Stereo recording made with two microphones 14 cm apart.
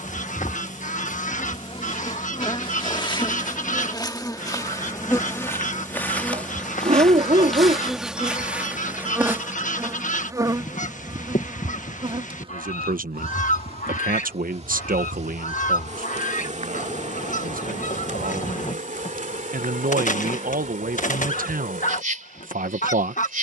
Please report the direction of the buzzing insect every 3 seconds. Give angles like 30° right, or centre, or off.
40° left, 20° left, centre, 20° right, 40° right, 50° right, 60° right, 70° right.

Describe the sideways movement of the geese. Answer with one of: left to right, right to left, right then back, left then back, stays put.
stays put.